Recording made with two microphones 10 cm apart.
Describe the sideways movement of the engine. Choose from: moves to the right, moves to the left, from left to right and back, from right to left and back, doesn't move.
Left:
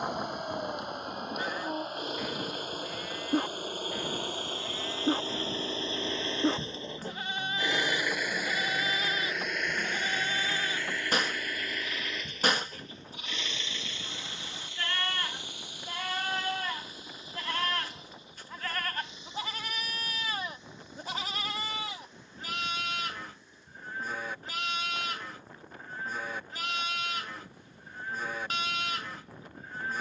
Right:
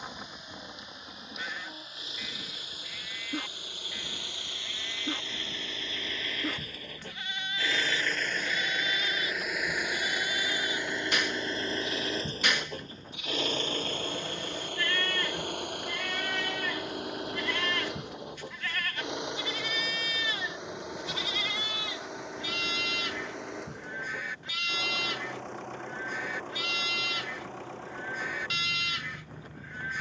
moves to the right.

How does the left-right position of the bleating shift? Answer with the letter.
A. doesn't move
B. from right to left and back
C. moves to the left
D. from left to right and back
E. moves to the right
A.